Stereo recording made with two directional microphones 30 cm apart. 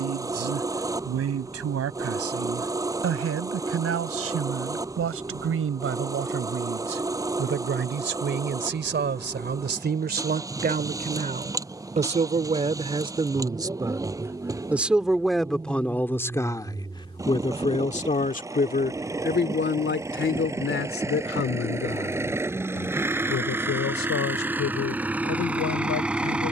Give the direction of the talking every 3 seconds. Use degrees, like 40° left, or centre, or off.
50° right, 50° right, 40° right, 30° right, 10° right, 10° left, 40° left, 50° left, 70° left.